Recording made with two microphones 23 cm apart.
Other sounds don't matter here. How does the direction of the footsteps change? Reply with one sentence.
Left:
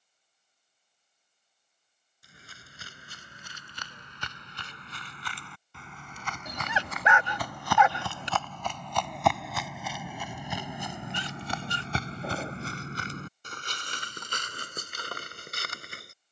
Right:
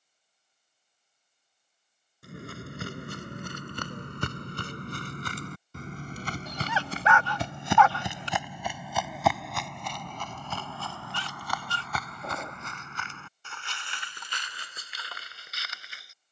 You can hear the footsteps travel towards the left.